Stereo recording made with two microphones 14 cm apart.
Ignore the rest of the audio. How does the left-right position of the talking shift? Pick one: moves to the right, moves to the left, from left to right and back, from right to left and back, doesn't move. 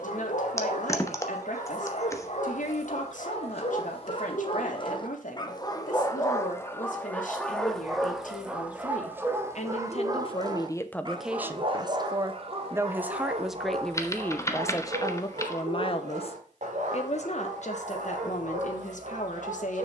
from left to right and back.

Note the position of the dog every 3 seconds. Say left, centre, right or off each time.
left, left, centre, right, right, right, right.